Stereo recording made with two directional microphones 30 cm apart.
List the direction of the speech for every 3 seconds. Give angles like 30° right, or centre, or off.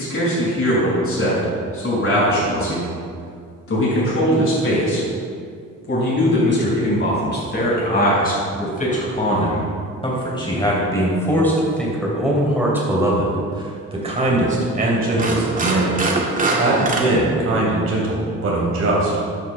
50° left, 50° left, 30° left, 10° left, 10° right, 40° right, 50° right.